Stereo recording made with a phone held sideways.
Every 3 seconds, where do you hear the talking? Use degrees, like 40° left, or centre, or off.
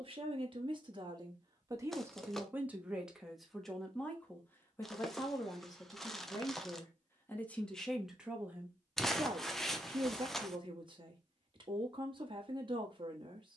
30° right, 10° left, 10° left, 30° right, 40° right.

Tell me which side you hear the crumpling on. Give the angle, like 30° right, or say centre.
centre.